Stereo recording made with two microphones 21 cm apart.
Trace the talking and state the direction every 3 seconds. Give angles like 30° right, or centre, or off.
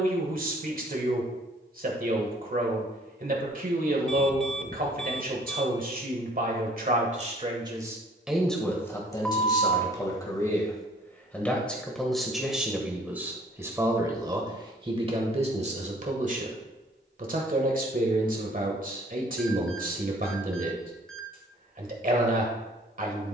40° right, 40° right, 20° right, 10° left, 10° right, 40° right, 40° right, 40° right.